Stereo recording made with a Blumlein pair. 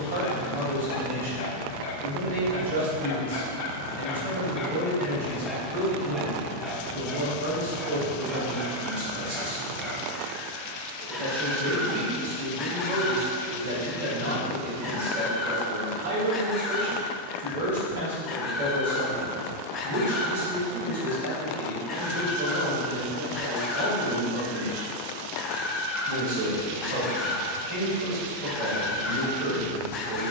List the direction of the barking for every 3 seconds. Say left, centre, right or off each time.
left, left, centre, centre, left, left, left, left, left, left.